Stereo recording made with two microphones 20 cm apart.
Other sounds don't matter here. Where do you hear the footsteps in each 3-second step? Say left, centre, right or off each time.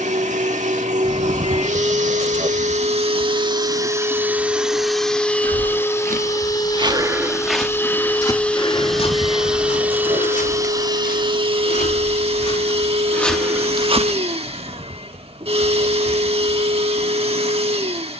off, right, centre, left, centre, off.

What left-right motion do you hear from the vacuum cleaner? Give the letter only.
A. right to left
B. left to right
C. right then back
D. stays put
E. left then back
E.